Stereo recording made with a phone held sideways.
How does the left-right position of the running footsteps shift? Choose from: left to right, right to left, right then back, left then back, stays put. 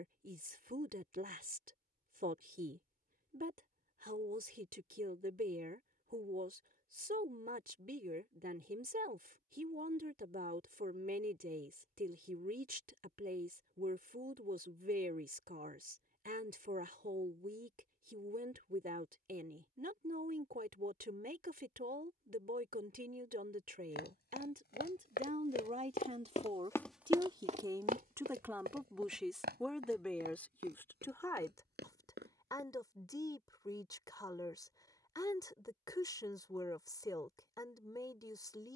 left to right.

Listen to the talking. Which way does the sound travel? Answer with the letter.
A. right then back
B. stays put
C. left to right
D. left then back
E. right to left
E.